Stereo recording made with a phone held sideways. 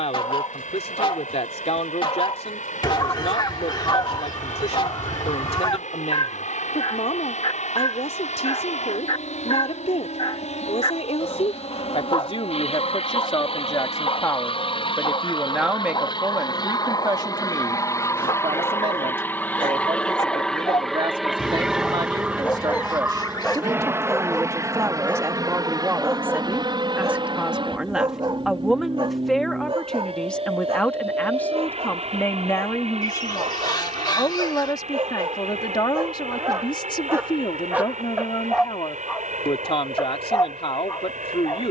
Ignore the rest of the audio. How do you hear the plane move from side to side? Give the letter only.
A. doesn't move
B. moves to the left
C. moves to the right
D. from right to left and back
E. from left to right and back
C.